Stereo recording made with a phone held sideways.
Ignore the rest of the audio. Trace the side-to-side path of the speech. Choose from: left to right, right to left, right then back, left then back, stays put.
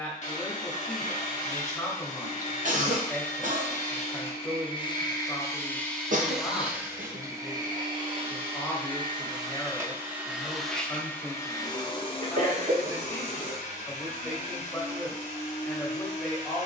stays put.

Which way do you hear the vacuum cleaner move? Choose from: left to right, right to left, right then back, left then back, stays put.
right then back.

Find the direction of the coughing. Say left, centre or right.
right.